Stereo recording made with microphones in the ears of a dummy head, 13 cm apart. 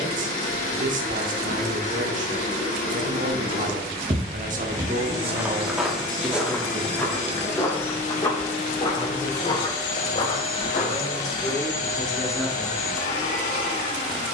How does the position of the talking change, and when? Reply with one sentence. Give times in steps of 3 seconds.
You can hear the talking on the right from 0 s, in the centre from 6 s, on the left from 9 s and in the centre from 12 s.